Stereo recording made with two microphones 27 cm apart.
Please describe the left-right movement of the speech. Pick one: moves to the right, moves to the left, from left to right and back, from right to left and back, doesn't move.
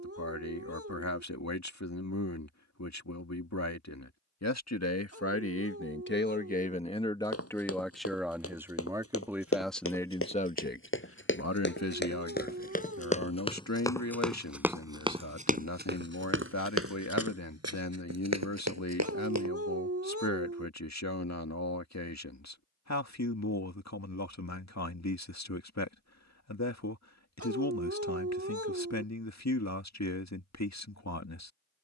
from left to right and back.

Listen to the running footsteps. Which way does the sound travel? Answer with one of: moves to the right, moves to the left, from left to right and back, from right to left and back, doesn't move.
moves to the right.